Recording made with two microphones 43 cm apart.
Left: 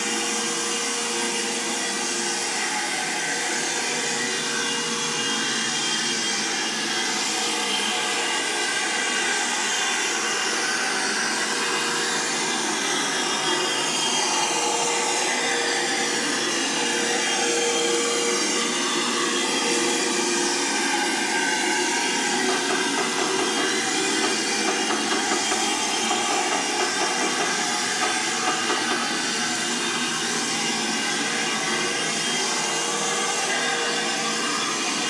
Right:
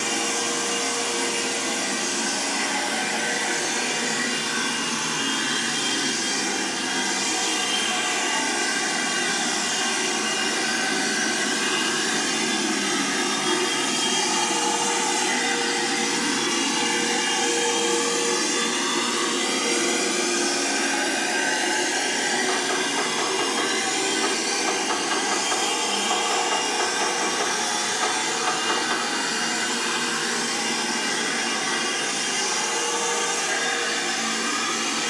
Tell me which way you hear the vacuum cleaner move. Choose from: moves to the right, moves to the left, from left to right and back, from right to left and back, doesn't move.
moves to the left.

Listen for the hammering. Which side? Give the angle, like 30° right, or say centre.
40° left.